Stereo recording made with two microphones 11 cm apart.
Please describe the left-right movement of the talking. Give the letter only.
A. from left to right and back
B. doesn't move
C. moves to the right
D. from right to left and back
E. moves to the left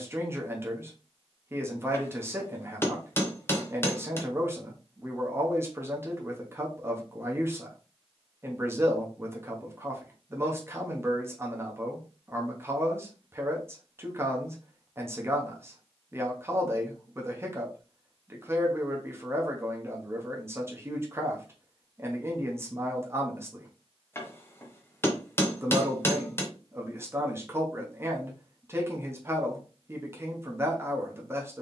B.